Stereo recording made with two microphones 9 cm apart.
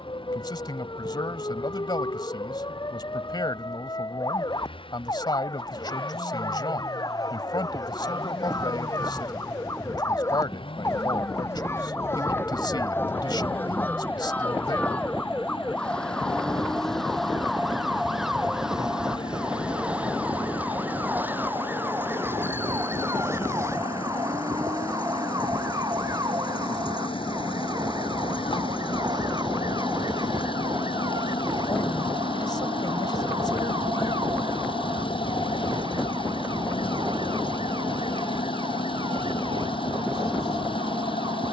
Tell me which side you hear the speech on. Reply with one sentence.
You can hear the speech on the left.